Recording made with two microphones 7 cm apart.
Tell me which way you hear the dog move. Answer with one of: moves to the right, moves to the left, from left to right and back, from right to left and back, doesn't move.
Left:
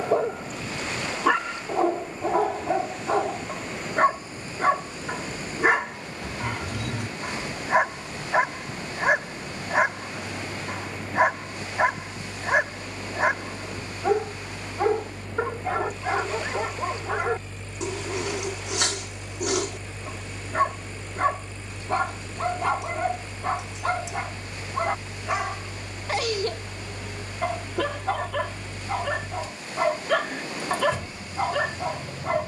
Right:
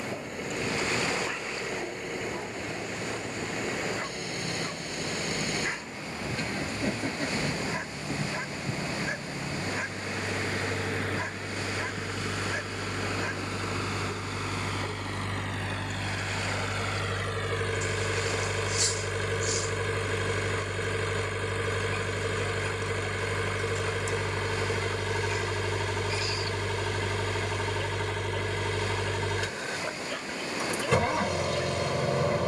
doesn't move.